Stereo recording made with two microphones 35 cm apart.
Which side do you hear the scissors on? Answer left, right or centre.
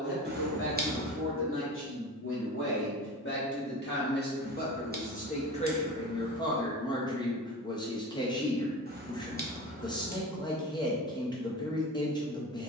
right.